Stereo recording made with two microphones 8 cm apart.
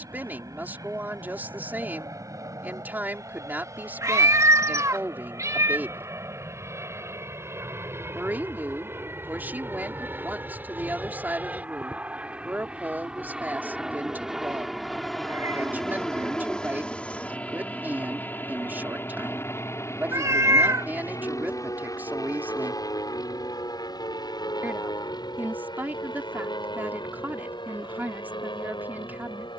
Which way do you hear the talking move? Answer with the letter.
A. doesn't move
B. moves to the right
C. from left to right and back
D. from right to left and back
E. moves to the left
A.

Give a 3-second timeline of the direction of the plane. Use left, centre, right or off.
right, right, right, right, centre, centre, left, left, left, left.